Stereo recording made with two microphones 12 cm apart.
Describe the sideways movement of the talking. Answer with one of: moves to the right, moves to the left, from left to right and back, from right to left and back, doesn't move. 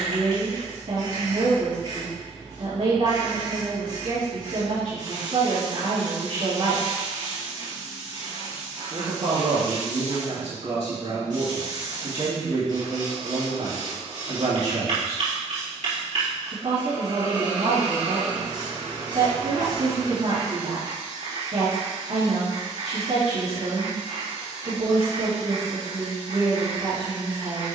doesn't move.